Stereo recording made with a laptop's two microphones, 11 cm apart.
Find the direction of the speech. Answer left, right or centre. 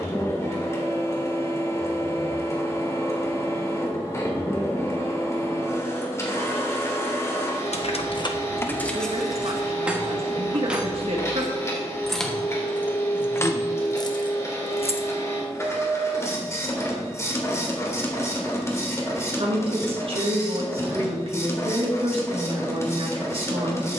right.